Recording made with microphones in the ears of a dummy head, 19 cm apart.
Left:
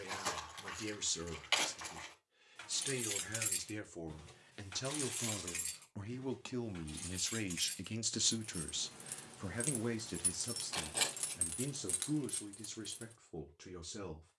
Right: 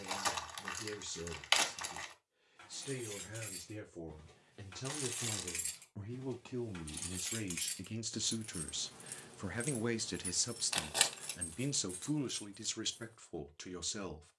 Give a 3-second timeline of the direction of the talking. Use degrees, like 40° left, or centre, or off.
60° left, 60° left, 30° left, 30° right, 60° right.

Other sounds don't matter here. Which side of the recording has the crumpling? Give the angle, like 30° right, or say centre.
40° right.